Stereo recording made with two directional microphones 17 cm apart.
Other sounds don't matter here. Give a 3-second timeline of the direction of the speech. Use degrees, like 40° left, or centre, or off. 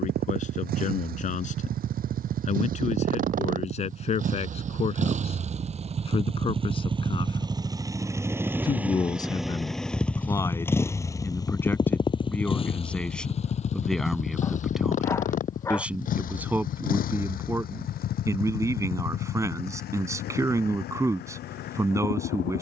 50° left, 40° left, 30° left, 20° left, centre, 10° right, 20° right, 20° right.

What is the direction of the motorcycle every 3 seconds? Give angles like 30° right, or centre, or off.
60° right, 50° right, 20° right, 10° left, 40° left, 50° left, 60° left, 70° left.